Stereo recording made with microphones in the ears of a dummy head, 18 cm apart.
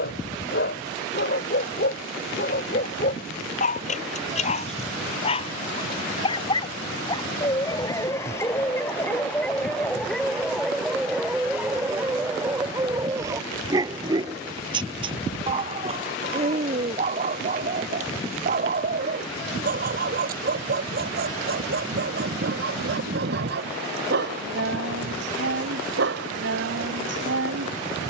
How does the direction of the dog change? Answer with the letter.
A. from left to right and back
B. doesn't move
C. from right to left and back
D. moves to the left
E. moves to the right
E.